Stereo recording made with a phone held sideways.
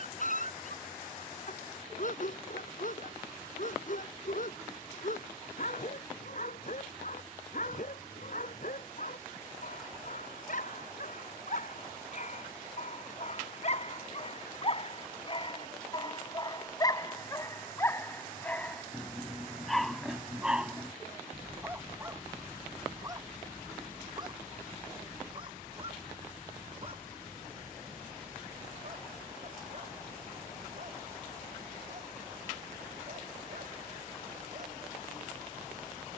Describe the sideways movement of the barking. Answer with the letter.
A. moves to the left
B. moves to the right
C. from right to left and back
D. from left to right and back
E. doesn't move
B.